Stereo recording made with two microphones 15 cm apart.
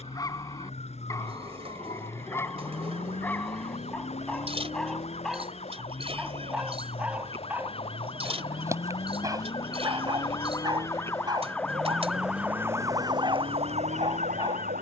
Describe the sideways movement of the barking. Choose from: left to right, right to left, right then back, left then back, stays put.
left to right.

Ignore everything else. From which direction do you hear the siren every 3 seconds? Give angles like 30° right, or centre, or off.
50° left, 50° left, 40° left, 20° left, 40° right.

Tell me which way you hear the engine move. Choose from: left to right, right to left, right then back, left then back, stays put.
stays put.